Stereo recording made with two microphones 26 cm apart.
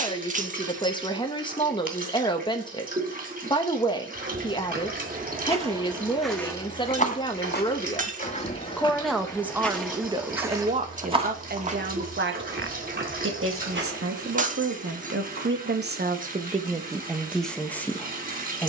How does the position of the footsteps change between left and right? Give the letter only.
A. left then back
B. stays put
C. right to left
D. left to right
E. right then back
A.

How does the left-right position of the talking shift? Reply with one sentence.
You can hear the talking move from left to right and back again.